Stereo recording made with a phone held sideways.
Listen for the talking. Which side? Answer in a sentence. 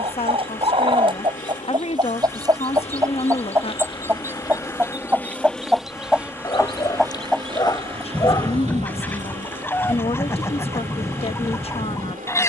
In this clip you hear the talking on the left.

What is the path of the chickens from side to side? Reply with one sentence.
In this clip you hear the chickens travel towards the left.